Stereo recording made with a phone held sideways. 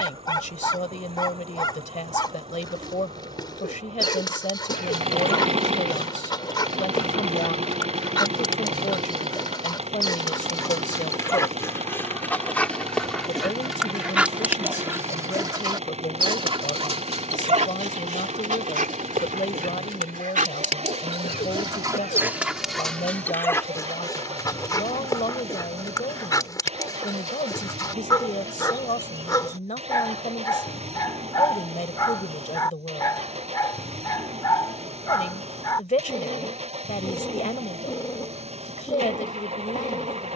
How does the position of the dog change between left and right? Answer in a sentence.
In this clip you hear the dog move from left to right and back again.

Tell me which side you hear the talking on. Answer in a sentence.
In this clip you hear the talking on the left.